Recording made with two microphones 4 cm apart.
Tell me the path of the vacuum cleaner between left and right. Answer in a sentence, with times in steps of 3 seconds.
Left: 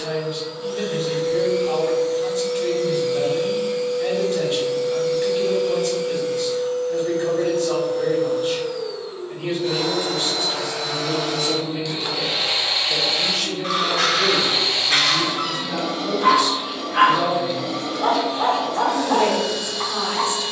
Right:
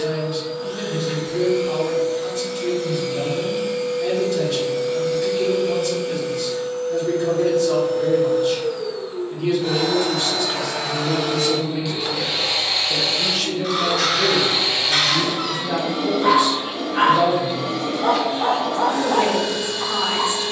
In this clip you hear the vacuum cleaner on the right from 0 s, in the centre from 12 s and on the right from 15 s.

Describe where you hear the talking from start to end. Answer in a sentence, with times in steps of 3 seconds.
In this clip you hear the talking on the left from 0 s, in the centre from 12 s and on the right from 15 s.